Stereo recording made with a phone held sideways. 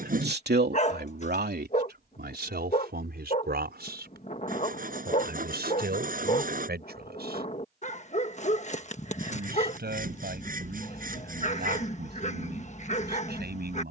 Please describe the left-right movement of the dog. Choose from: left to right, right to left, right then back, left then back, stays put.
stays put.